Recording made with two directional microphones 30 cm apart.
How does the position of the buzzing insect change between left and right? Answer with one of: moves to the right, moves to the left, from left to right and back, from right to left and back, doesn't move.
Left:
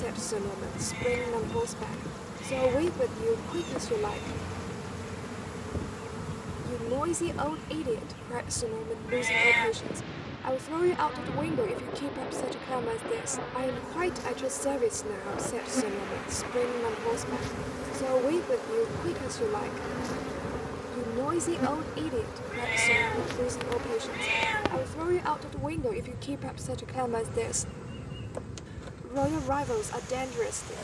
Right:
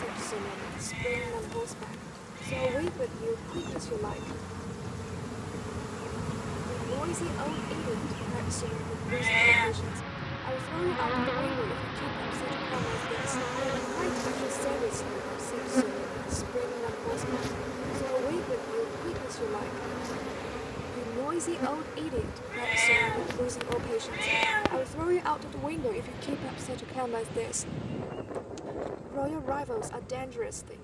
from left to right and back.